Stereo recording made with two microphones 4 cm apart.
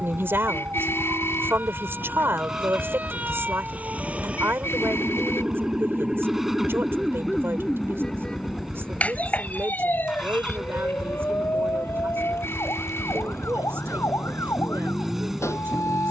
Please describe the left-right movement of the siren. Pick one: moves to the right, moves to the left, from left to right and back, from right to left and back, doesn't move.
moves to the left.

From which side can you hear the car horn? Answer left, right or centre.
left.